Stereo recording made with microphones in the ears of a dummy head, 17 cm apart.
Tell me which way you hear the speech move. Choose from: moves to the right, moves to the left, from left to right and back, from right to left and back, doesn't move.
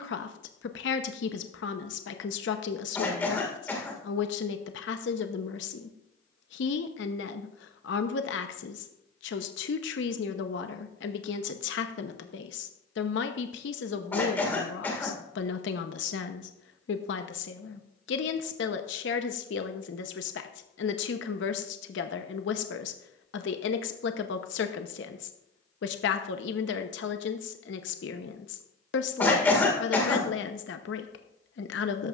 doesn't move.